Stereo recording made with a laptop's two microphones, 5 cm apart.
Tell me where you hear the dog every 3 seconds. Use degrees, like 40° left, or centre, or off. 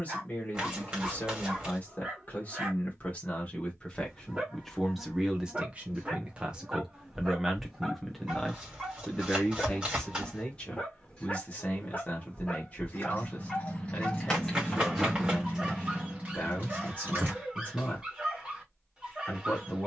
20° right, 20° right, 10° right, 10° left, 10° left, 10° right, 10° right.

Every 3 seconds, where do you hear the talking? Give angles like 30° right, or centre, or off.
30° left, 10° left, 10° right, 20° left, 30° left, 30° left, 30° left.